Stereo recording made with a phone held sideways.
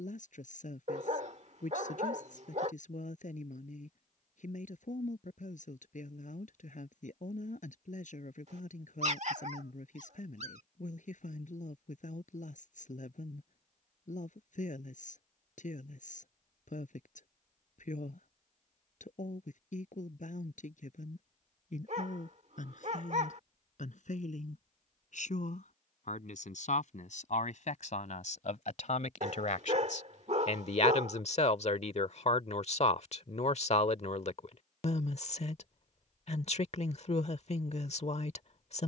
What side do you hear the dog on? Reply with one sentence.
You can hear the dog on the right.